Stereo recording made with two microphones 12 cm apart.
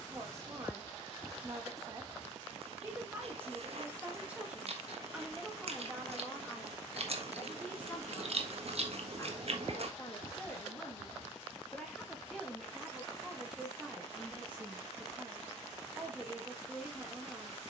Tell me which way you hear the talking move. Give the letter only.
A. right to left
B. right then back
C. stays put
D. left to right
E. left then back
E.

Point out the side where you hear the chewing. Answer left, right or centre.
right.